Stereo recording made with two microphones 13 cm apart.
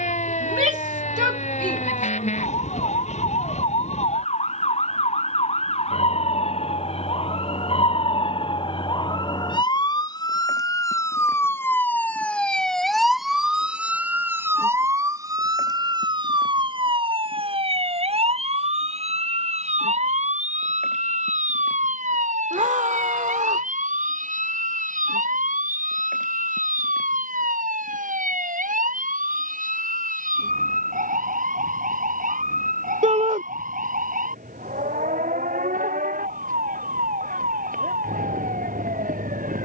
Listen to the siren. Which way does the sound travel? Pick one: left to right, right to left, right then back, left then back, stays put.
left to right.